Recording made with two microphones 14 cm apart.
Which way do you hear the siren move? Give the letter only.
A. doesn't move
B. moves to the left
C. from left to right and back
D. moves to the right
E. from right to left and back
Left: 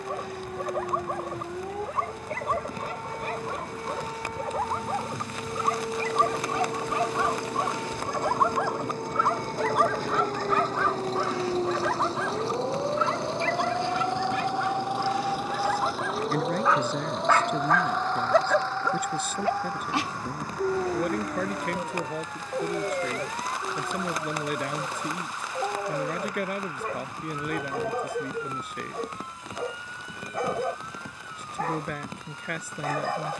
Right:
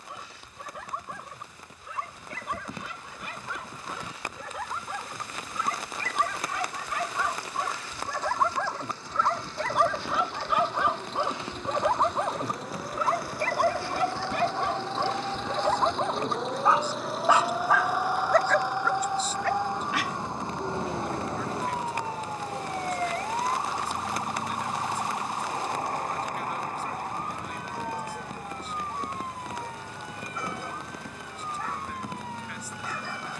D.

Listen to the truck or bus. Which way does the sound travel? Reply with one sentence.
In this clip you hear the truck or bus travel towards the right.